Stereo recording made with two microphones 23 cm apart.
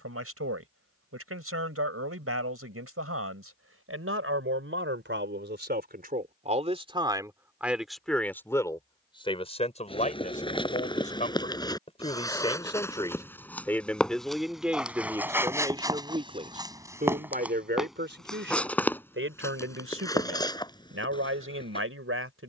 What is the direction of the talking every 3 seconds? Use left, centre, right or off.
right, right, centre, left, centre, right, right, right.